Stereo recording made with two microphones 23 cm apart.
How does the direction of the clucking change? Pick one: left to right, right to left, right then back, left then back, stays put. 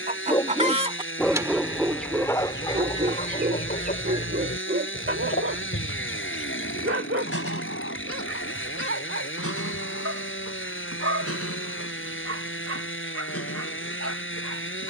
right to left.